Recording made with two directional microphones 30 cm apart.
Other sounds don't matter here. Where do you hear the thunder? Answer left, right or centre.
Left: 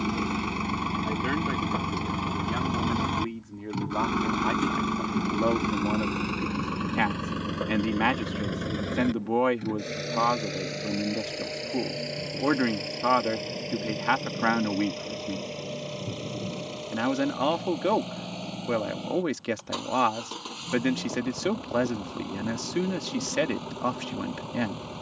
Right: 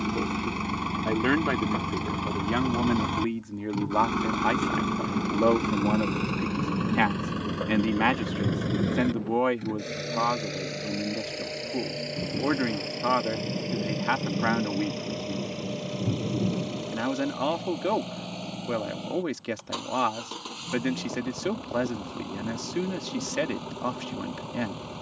right.